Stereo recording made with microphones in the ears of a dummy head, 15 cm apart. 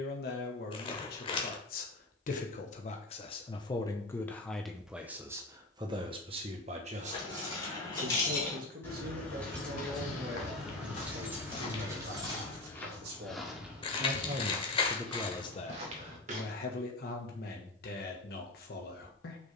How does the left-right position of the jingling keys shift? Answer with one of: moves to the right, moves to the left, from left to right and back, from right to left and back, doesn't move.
moves to the right.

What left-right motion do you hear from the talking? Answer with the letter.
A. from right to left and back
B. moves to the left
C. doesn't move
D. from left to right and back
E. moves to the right
D.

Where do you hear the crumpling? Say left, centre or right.
left.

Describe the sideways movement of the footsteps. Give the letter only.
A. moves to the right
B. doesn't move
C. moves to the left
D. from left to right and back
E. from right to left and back
A.